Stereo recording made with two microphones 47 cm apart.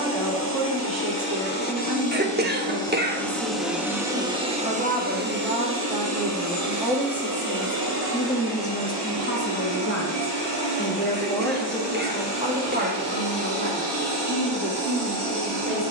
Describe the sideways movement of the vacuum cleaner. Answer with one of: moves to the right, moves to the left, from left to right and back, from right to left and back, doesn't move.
moves to the right.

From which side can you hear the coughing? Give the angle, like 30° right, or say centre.
20° right.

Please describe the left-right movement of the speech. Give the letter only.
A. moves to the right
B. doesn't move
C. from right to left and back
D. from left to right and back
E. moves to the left
C.